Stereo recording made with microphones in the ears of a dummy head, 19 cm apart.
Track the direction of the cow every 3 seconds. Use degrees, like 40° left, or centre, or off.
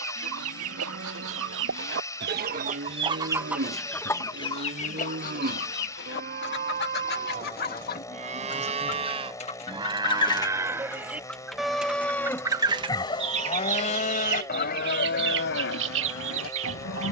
50° right, 50° right, 40° right, 10° right, 30° left, 60° left.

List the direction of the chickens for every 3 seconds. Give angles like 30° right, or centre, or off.
60° right, 20° left, 40° left, 20° left, 30° right, 60° right.